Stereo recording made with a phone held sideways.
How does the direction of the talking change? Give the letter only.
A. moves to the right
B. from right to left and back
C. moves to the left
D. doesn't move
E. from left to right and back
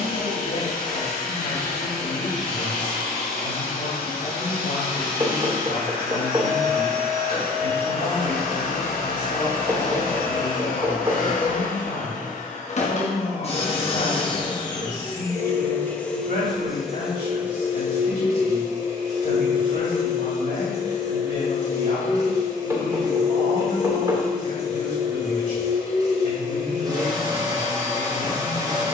D.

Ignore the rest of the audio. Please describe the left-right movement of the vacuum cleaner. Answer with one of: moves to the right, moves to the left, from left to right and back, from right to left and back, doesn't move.
moves to the right.